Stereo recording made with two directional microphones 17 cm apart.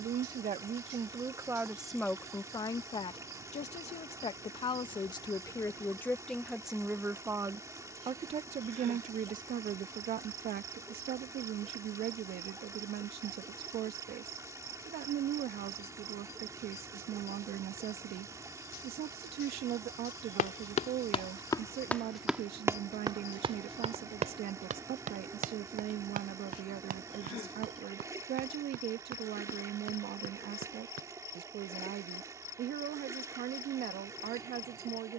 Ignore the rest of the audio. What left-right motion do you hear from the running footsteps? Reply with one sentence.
In this clip you hear the running footsteps travel towards the right.